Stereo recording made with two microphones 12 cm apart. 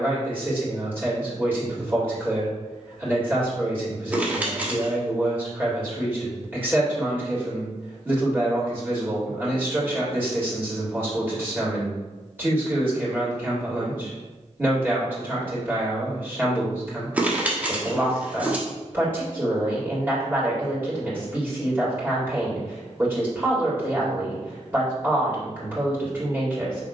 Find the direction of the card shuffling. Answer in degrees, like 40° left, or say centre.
10° right.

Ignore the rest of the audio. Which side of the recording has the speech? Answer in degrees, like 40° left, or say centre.
20° right.